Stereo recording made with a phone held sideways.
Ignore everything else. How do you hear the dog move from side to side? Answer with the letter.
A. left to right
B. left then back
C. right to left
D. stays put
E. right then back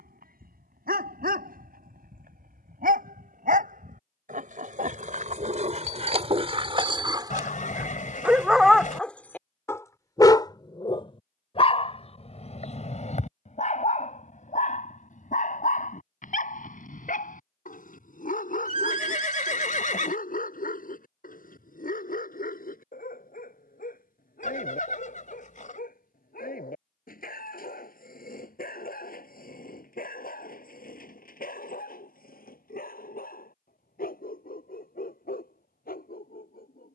C.